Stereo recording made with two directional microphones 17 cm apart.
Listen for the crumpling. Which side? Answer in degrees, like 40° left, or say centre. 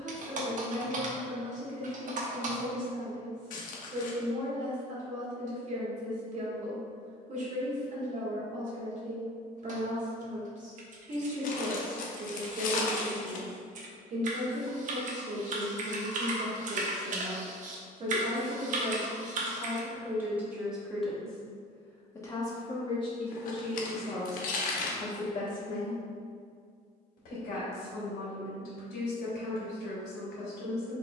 50° left.